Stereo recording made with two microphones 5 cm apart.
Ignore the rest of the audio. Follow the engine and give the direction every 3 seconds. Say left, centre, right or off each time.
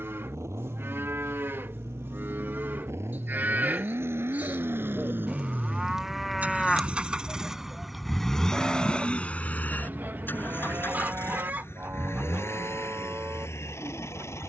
right, right, centre, left, left.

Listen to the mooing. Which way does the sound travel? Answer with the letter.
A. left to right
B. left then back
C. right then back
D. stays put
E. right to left
B.